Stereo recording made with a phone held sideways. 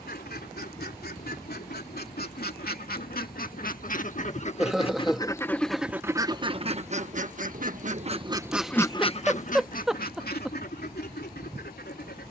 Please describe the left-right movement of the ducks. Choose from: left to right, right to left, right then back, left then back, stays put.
right then back.